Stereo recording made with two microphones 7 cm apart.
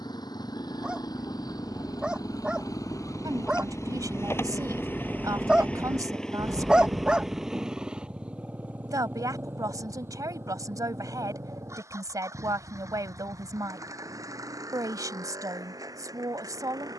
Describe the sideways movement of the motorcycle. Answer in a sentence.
In this clip you hear the motorcycle travel towards the right.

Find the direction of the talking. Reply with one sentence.
You can hear the talking on the right.